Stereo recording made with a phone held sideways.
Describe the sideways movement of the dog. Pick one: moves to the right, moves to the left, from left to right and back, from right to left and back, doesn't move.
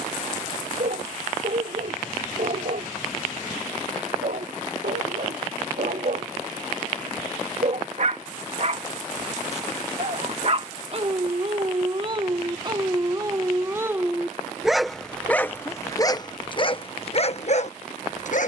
moves to the left.